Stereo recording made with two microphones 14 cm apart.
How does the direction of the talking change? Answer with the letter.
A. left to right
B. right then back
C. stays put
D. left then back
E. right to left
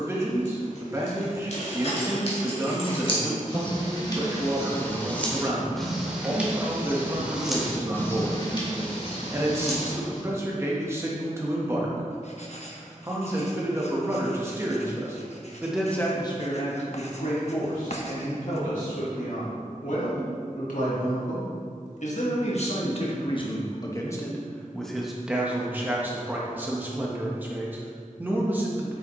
D.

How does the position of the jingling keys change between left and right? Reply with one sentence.
In this clip you hear the jingling keys go right and come back.